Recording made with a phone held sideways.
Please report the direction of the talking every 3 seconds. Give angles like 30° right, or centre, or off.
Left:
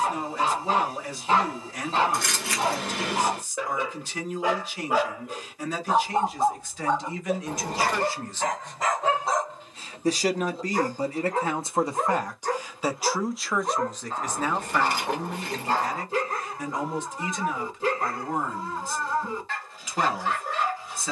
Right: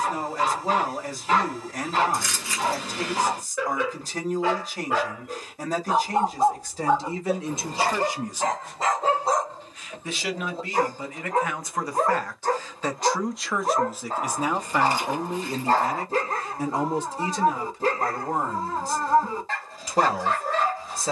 40° right, 40° right, 30° right, 40° left, centre, 30° right, 40° right.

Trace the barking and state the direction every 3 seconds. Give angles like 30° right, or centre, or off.
30° left, 20° left, 20° right, 40° right, 40° right, 40° right, 40° right.